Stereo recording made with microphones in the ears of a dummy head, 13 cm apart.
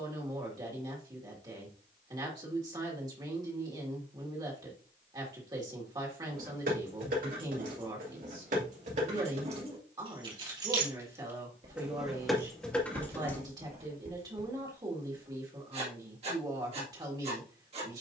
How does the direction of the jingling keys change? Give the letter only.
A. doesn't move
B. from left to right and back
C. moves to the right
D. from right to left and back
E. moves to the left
E.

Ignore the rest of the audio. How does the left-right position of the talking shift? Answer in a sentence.
You can hear the talking stay put.